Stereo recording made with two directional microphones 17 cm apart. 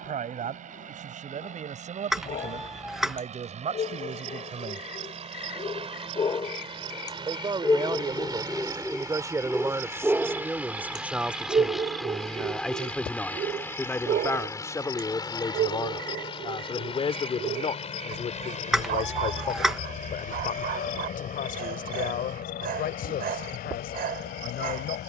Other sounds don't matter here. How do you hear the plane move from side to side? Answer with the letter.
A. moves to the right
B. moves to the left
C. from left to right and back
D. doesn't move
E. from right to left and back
B.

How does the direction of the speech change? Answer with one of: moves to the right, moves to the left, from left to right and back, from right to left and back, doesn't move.
moves to the left.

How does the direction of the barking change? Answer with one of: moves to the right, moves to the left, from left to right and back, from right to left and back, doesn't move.
moves to the right.